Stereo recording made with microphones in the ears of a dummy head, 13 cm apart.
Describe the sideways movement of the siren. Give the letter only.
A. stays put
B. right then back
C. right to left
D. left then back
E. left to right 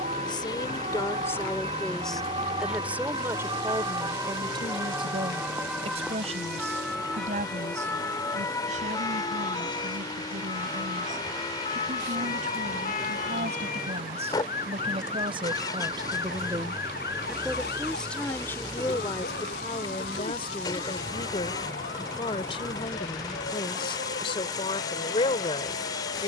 C.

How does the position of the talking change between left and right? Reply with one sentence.
You can hear the talking move from left to right and back again.